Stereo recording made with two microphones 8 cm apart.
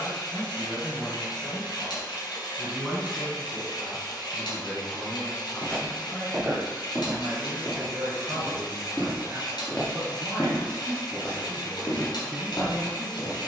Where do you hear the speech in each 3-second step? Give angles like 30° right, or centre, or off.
10° left, 10° right, 30° right, 30° right, centre.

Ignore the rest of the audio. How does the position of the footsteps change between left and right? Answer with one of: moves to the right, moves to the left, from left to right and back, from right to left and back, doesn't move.
moves to the left.